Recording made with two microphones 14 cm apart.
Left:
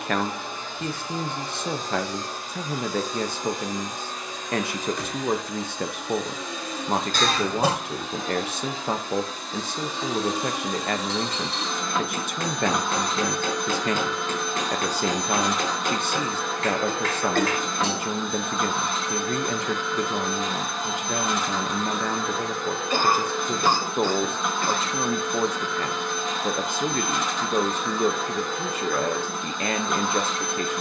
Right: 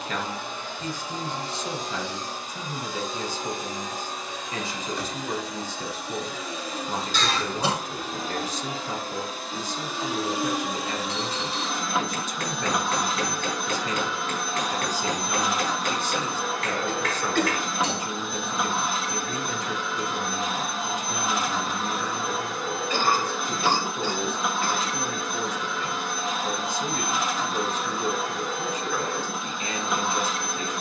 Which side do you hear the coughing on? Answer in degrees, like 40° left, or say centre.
50° left.